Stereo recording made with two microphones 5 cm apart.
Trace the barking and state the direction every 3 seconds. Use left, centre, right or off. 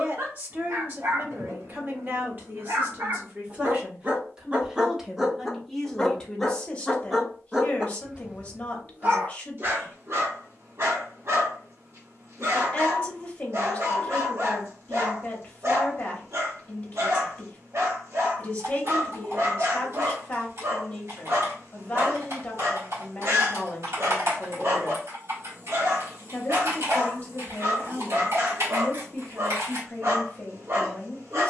right, right, centre, right, right, right, right, right, right, right, right.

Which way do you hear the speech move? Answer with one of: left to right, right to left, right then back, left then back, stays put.
right to left.